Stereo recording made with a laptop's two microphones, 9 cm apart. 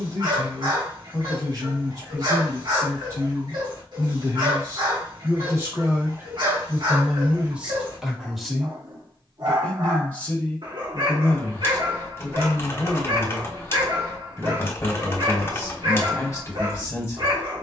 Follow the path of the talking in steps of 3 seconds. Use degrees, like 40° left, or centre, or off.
40° right, 40° right, 10° right, 20° left, 30° left, 30° left.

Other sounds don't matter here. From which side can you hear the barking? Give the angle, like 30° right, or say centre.
60° right.